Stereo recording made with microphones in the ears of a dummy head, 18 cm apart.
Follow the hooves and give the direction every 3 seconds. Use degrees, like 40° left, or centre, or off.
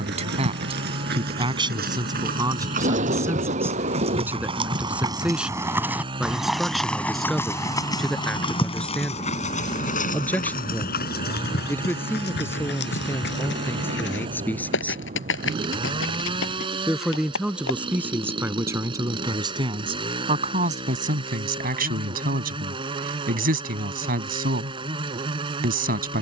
50° right, 30° right, 10° left, 40° left, 60° left, 70° left, off, off, off.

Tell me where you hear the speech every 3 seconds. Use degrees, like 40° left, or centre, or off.
20° right, 10° right, centre, 10° left, 10° left, centre, 20° right, 40° right, 50° right.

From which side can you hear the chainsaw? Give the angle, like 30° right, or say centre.
20° right.